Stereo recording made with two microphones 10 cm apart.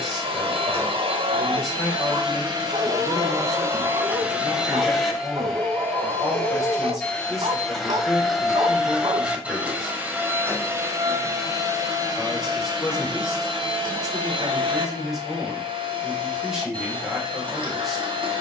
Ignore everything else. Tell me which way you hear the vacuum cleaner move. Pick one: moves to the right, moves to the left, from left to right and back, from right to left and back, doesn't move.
from right to left and back.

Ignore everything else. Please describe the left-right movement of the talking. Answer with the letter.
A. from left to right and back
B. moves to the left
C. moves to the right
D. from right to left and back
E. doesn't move
E.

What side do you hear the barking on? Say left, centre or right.
right.